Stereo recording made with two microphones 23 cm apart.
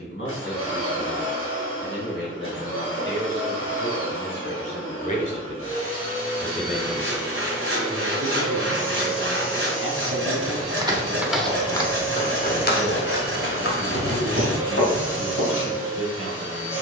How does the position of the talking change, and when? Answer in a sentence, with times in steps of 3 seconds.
You can hear the talking on the left from 0 s and on the right from 6 s.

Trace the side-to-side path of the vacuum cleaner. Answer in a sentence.
In this clip you hear the vacuum cleaner stay in one place.